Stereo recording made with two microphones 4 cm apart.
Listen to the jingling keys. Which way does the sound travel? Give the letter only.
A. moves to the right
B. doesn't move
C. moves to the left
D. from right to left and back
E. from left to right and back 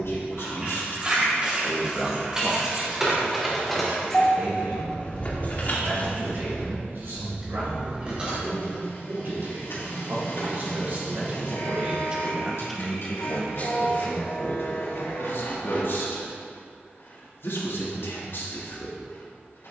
D.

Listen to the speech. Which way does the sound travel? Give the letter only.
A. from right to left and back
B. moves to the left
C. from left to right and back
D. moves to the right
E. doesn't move
C.